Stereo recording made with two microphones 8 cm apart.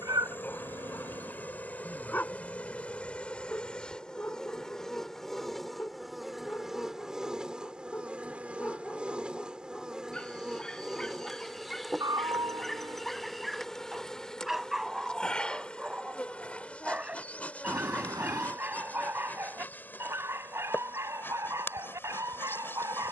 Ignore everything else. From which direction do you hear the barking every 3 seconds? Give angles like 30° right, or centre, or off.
20° left, 20° left, 20° left, 10° left, centre, 10° right, 30° right, 40° right.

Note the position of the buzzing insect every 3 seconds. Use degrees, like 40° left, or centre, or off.
20° left, 10° left, 10° right, 10° right, centre, 10° left, 20° left, 30° left.